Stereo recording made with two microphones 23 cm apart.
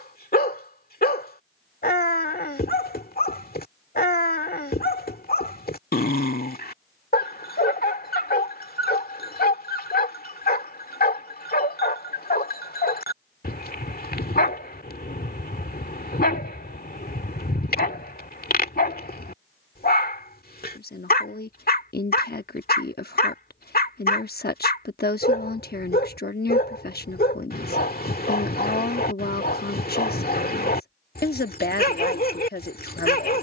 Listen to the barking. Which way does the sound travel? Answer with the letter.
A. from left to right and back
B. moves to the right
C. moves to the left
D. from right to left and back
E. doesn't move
E.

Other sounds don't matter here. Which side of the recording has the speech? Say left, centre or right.
left.